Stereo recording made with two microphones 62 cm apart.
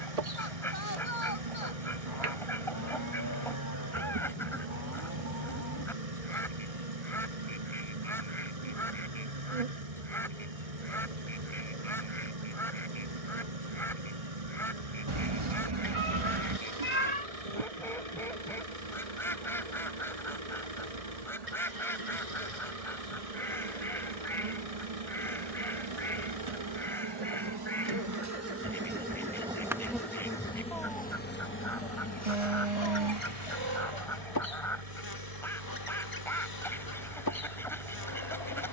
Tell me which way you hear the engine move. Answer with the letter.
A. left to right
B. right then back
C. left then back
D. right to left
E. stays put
E.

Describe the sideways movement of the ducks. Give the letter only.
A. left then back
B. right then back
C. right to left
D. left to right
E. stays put
E.